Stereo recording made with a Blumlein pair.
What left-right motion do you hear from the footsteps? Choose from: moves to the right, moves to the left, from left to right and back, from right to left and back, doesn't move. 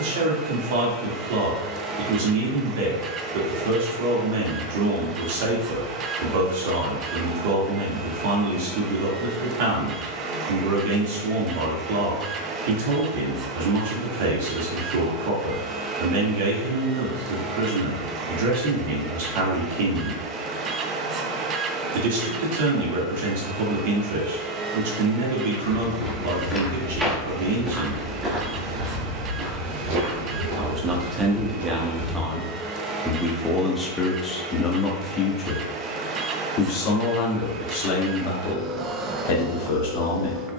moves to the right.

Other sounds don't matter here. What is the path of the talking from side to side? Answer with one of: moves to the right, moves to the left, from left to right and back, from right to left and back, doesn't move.
moves to the left.